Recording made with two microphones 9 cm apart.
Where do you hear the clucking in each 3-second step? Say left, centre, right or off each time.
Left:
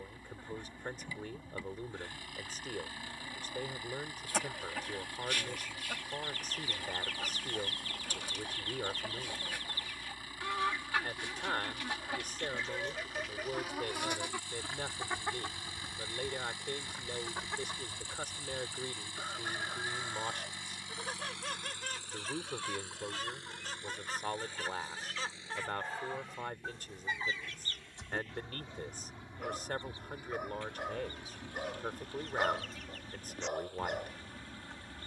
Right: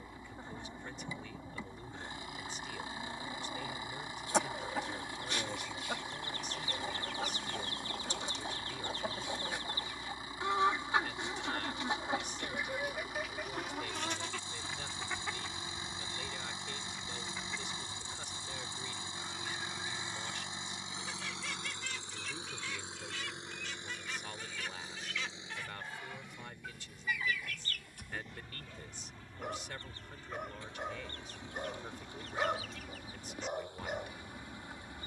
right, right, right, right, centre, left, left, left, left, left, centre, centre.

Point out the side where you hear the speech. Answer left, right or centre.
left.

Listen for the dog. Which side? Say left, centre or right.
centre.